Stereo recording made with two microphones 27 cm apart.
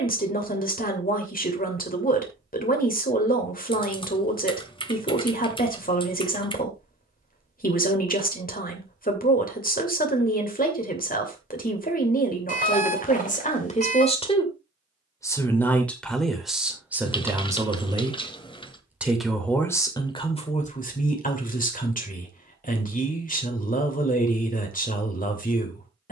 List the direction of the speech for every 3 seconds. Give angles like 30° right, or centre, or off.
30° left, 30° left, 30° left, 30° left, 30° left, centre, 10° left, 30° left, 30° left.